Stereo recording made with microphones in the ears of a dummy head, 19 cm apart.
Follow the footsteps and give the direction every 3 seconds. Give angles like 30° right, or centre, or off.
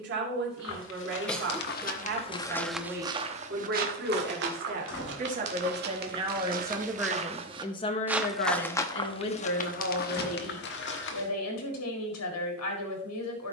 40° left, 50° right, 20° right, 50° left, off.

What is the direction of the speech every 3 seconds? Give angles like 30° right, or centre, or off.
50° right, 40° right, 10° left, 70° left, 80° left.